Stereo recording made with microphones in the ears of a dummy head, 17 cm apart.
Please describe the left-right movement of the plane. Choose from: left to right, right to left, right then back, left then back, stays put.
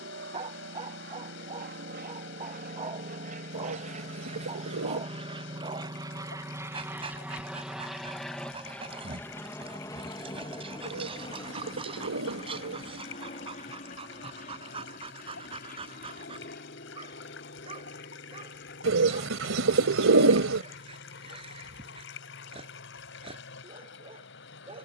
right to left.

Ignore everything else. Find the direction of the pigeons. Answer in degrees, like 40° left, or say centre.
70° right.